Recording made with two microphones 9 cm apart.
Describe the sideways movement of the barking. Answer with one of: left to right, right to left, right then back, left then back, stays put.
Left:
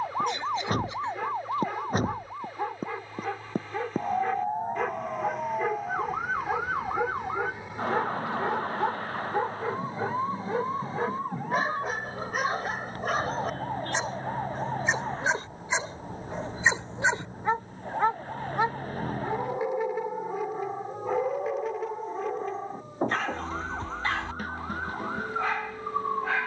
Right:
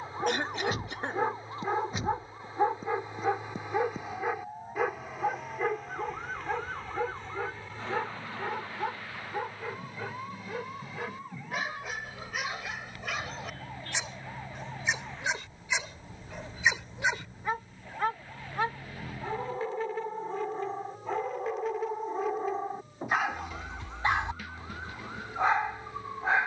left then back.